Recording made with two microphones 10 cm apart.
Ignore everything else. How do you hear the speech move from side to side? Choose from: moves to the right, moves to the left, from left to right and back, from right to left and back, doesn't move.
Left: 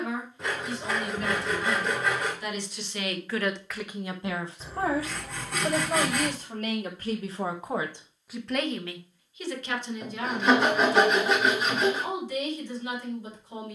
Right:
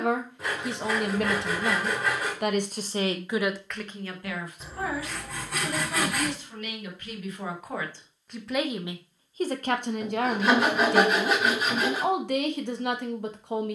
from right to left and back.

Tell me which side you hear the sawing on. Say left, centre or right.
centre.